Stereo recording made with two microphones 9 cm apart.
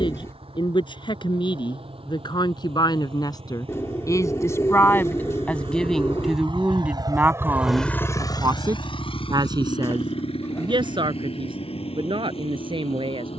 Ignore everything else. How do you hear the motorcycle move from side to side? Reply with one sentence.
You can hear the motorcycle travel towards the left.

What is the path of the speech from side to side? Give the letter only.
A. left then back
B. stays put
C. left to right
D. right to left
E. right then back
C.